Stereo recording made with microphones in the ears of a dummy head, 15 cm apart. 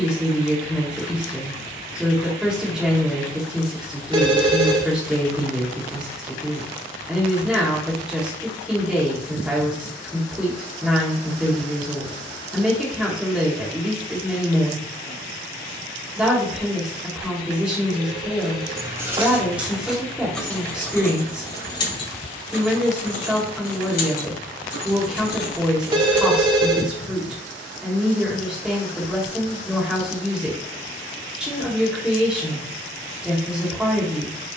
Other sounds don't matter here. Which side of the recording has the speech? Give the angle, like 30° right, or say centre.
centre.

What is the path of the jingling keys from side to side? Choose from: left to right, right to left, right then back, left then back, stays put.
right to left.